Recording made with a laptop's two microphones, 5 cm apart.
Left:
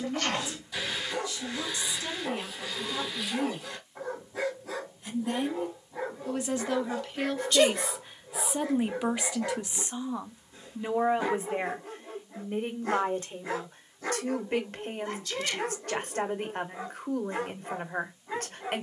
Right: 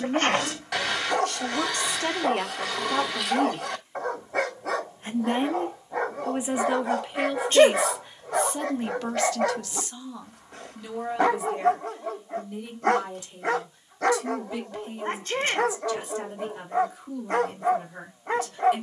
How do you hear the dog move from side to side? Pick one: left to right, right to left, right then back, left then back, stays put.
stays put.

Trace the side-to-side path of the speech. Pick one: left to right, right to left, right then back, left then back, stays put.
right to left.